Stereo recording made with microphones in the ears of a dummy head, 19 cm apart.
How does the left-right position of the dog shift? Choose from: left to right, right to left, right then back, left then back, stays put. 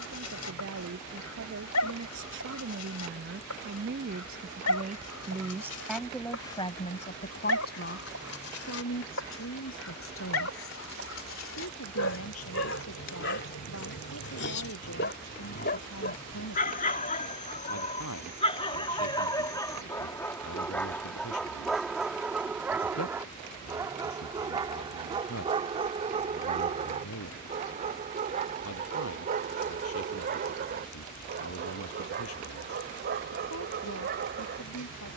left to right.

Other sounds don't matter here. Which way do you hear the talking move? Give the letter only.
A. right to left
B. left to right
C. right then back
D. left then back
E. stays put
A.